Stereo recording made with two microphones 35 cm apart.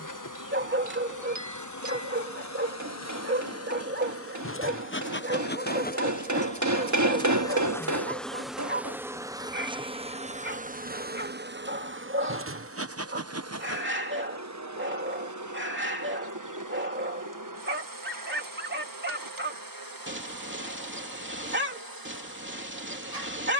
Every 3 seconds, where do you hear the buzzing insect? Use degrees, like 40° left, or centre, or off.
50° left, 30° left, 10° left, 20° right, 40° right, 50° right, 60° right, 70° right.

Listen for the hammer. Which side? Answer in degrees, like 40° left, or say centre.
50° right.